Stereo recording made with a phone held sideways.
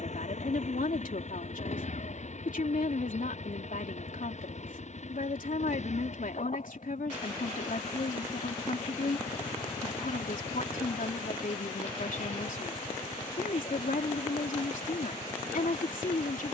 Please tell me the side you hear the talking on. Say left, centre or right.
left.